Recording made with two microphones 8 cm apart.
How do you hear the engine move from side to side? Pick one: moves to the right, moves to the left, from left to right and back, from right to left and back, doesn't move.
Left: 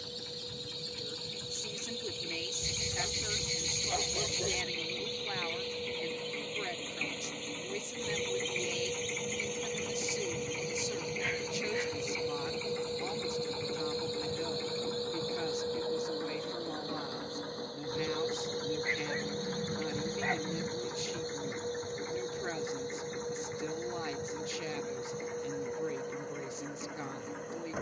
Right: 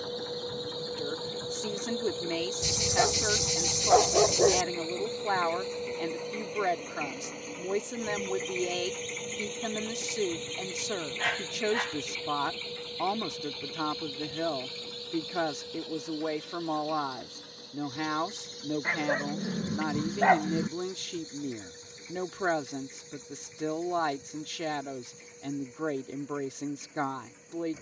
moves to the left.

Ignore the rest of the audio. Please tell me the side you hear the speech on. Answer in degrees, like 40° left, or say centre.
70° right.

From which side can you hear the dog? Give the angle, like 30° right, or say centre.
80° right.